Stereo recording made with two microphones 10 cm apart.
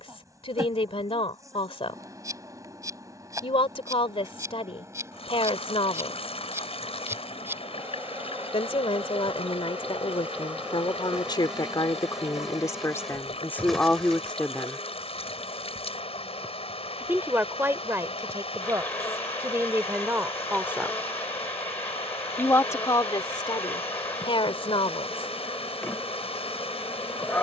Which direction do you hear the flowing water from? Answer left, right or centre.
left.